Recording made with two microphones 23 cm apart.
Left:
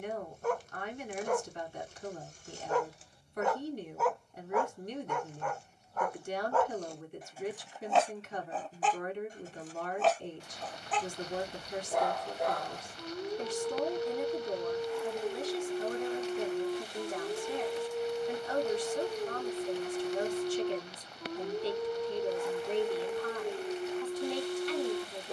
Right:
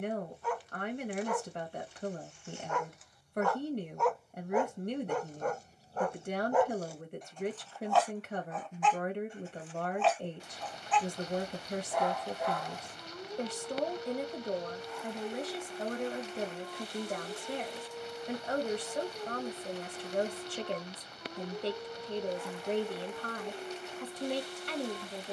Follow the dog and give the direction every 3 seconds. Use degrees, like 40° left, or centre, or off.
40° left, 10° right, centre, 40° left, 40° left, 40° left, 40° left, 40° left, 40° left.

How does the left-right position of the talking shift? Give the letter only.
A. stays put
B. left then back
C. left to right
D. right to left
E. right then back
A.